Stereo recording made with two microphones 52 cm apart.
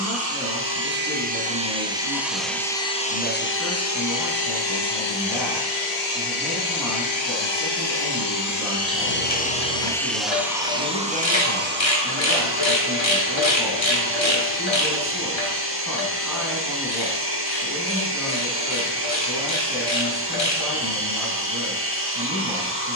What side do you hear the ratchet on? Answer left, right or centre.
left.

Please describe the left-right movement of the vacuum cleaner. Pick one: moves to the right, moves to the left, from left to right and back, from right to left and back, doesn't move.
from right to left and back.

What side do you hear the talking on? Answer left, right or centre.
centre.